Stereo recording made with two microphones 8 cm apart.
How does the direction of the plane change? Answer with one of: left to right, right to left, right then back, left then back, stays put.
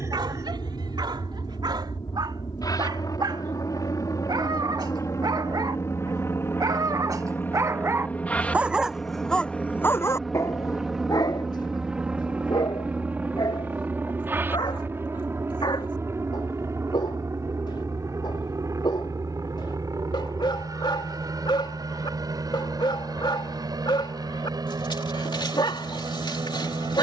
left to right.